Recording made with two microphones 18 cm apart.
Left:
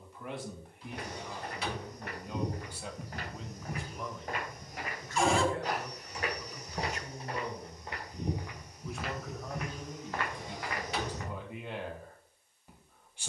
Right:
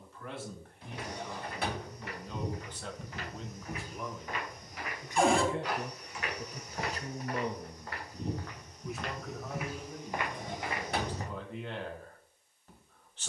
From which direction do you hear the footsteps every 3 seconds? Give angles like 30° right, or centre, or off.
60° left, 50° left, 30° left, 10° right, off.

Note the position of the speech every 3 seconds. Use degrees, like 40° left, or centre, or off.
10° left, 10° right, 30° right, 10° left, 10° left.